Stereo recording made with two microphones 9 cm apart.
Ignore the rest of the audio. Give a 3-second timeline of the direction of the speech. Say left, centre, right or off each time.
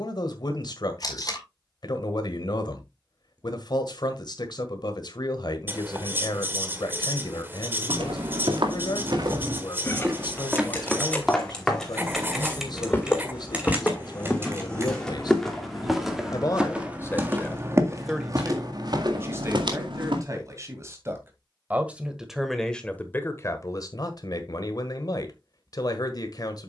left, left, left, left, left, left, right, centre, left.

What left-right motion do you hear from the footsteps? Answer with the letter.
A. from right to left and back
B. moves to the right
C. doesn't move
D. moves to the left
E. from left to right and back
A.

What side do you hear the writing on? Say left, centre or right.
right.